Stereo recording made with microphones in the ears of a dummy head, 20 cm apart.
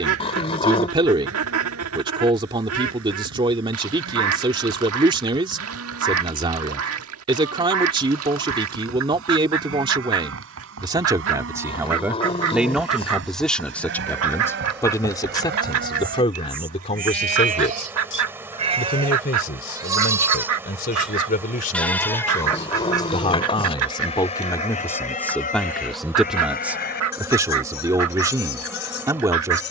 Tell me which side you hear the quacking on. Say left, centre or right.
right.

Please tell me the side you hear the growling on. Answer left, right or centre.
left.